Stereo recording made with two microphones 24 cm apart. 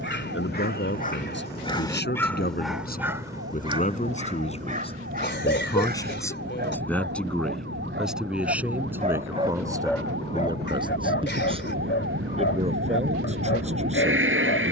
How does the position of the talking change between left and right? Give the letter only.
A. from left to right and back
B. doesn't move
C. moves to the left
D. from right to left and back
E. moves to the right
E.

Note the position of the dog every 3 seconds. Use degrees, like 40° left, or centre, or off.
20° left, 30° right, 50° right, 30° left, 60° left.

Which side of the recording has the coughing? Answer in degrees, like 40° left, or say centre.
50° left.